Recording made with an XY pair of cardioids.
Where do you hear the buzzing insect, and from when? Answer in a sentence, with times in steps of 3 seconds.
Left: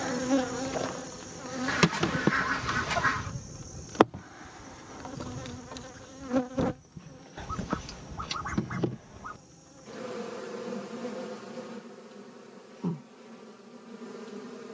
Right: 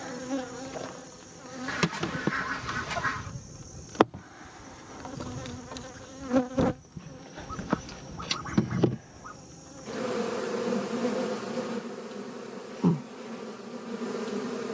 In this clip you hear the buzzing insect on the left from 0 s, in the centre from 3 s and on the right from 6 s.